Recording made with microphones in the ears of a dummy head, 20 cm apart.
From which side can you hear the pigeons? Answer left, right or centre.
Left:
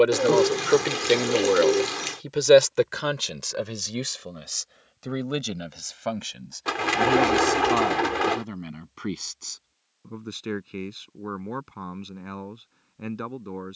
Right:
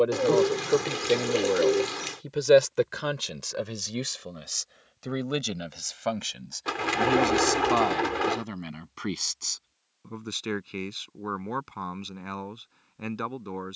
centre.